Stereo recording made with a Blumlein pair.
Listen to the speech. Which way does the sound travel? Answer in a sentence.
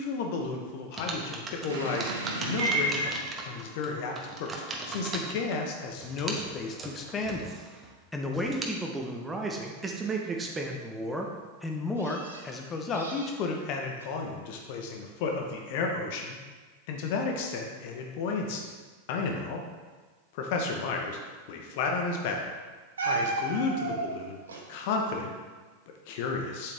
You can hear the speech move from left to right and back again.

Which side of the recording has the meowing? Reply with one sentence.
In this clip you hear the meowing on the right.